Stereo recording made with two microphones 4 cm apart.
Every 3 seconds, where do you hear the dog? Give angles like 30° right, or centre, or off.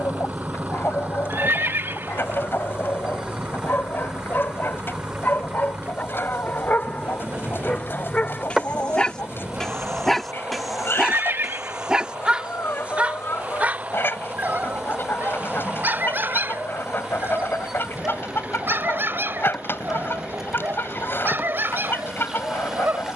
60° left, 50° left, 30° left, centre, 40° right, 60° right, 70° right, 70° right.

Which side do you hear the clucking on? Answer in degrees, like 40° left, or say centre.
60° left.